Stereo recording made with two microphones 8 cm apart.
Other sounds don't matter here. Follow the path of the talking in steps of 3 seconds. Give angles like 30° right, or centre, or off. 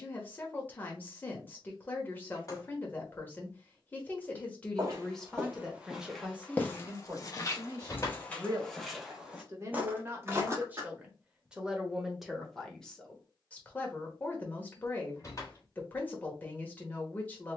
20° left, 10° left, 30° right, 20° right, 10° left, 20° left.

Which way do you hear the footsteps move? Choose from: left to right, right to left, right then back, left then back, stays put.
left then back.